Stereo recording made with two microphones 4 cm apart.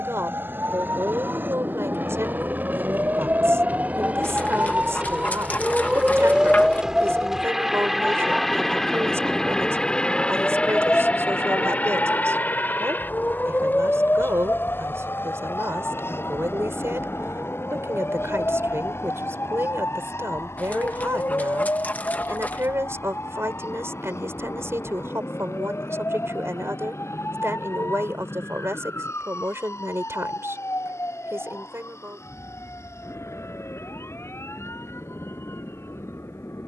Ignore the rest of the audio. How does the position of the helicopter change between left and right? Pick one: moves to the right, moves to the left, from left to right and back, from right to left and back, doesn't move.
moves to the left.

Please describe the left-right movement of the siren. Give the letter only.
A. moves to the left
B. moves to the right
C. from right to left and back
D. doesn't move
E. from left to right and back
A.